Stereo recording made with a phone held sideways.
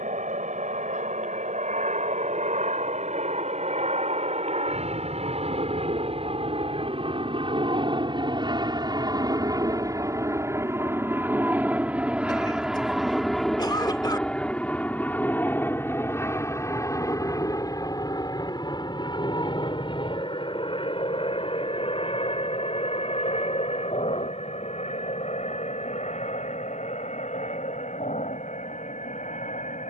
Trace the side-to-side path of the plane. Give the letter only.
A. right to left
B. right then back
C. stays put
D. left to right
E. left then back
A.